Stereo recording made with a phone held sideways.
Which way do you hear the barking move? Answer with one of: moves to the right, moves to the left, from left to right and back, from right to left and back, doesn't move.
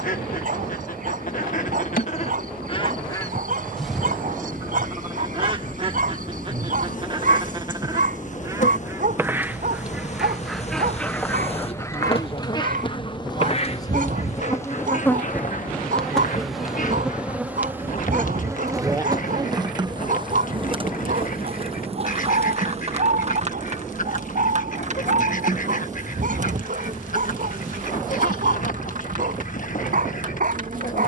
doesn't move.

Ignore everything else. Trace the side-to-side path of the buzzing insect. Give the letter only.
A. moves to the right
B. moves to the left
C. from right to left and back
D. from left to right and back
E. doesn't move
A.